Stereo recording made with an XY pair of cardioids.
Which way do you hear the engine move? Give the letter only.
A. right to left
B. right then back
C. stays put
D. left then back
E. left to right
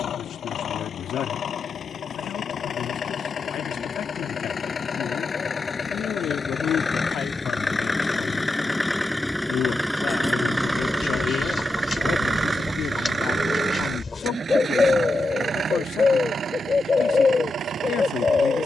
E.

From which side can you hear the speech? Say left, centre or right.
left.